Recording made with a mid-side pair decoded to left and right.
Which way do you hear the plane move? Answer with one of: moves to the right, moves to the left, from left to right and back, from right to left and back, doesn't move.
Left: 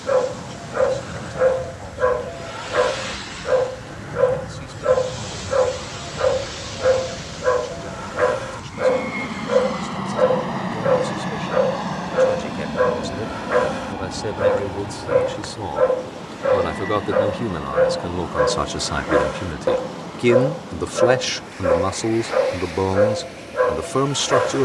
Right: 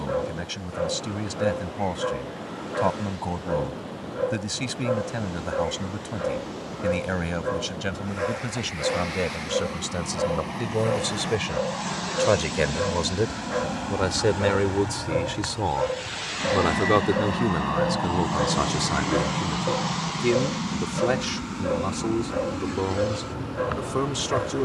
moves to the right.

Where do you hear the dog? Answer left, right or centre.
left.